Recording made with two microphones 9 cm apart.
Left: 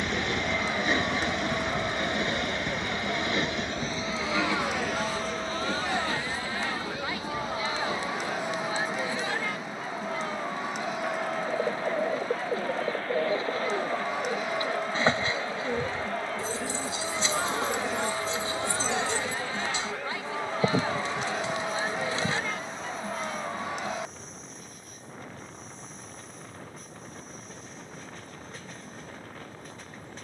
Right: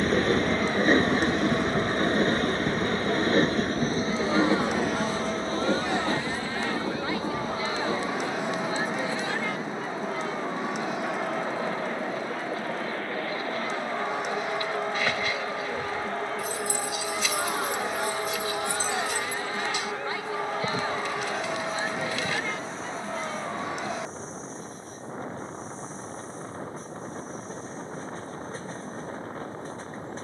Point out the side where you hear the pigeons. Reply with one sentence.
In this clip you hear the pigeons on the left.